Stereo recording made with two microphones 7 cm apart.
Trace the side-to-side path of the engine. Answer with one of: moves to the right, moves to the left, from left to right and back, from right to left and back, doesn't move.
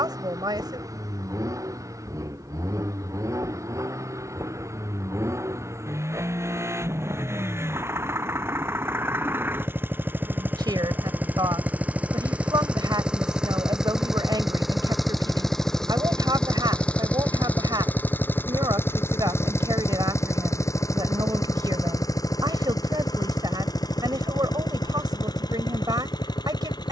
moves to the left.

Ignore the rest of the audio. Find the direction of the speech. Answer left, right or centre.
right.